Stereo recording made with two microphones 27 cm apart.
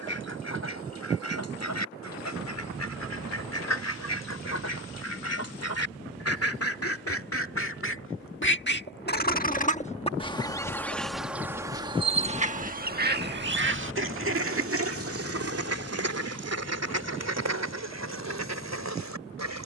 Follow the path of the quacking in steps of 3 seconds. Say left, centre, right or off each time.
left, left, left, centre, right, right, right.